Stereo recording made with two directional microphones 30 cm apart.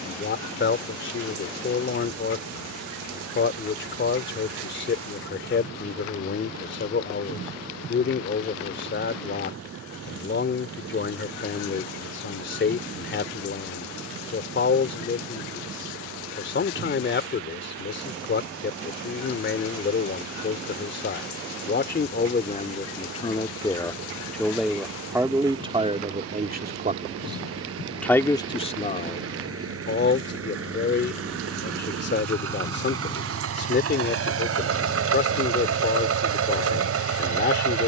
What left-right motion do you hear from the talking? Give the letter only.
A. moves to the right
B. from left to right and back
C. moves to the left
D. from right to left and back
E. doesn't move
B.